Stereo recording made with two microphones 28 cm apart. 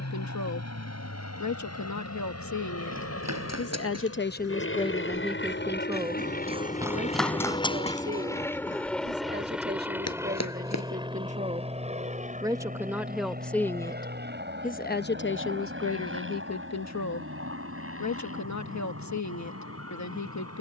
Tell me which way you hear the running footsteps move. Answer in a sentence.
You can hear the running footsteps move to the left.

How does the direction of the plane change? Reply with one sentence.
In this clip you hear the plane move to the right.